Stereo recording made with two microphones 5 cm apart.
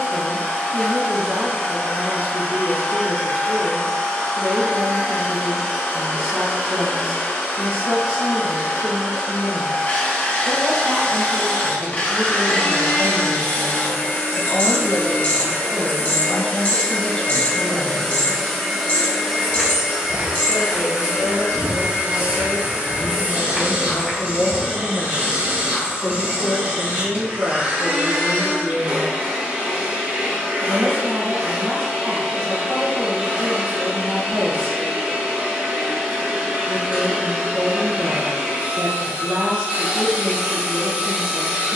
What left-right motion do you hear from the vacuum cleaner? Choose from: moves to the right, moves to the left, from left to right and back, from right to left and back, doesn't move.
moves to the right.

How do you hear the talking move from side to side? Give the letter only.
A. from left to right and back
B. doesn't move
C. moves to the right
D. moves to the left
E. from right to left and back
E.